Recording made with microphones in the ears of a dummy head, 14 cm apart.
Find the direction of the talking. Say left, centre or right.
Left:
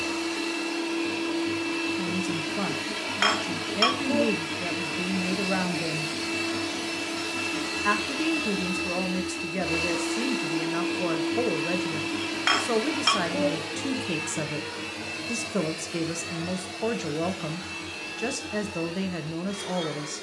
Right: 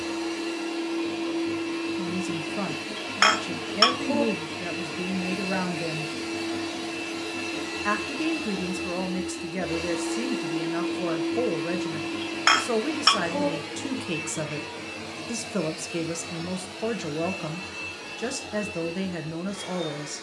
centre.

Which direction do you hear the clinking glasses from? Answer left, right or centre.
right.